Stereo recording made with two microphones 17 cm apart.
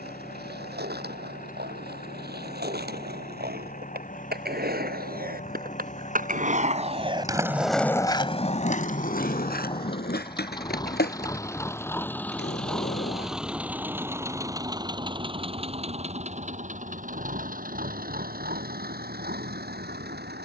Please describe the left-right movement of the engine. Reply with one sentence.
In this clip you hear the engine travel towards the right.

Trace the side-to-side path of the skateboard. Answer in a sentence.
In this clip you hear the skateboard move to the left.